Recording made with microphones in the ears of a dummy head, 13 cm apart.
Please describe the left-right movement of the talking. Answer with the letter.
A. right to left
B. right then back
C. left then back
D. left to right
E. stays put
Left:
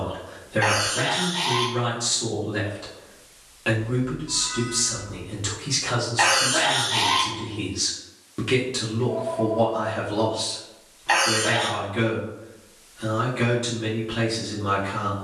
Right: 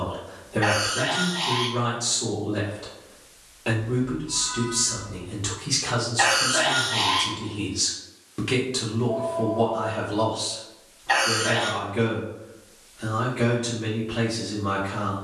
B.